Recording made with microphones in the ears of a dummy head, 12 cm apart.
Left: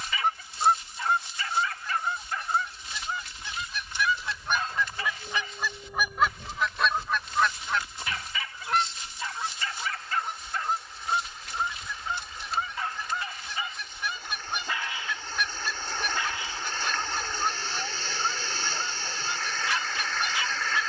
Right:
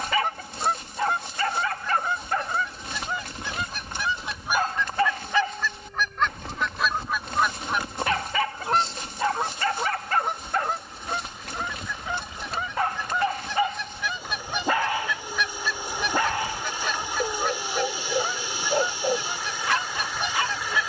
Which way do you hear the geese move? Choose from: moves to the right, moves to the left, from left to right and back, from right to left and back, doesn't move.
from right to left and back.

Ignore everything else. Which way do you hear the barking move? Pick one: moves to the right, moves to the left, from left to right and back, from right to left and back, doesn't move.
doesn't move.